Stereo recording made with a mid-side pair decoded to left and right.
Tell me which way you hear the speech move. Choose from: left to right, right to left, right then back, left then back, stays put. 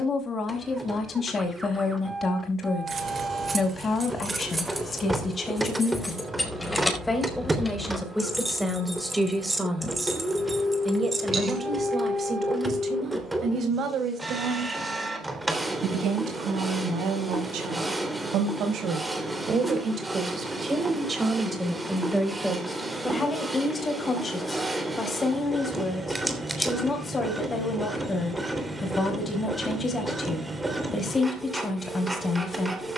right then back.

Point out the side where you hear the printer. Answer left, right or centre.
centre.